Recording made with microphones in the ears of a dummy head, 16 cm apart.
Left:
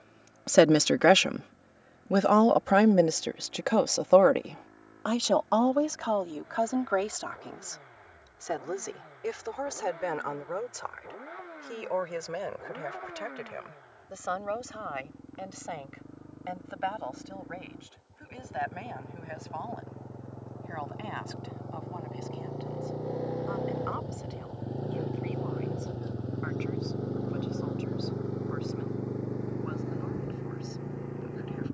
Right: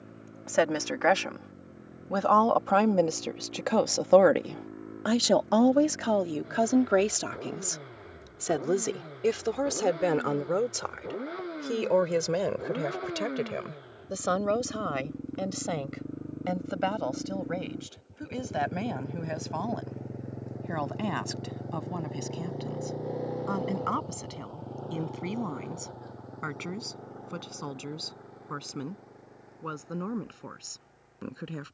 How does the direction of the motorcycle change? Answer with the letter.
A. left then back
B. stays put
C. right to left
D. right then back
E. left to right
C.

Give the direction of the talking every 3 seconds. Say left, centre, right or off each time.
left, centre, right, right, right, right, right, right, right, right, right.